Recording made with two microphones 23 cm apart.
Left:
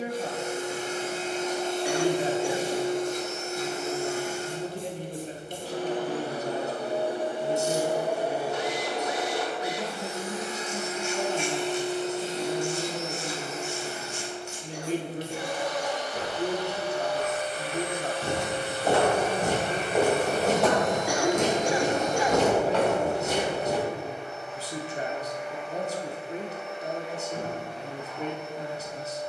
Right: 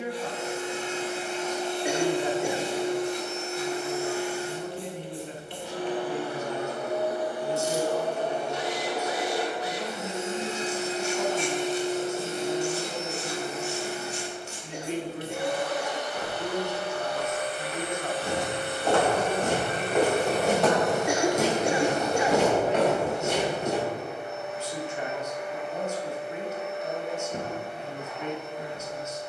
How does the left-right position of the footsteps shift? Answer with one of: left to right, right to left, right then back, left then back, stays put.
left to right.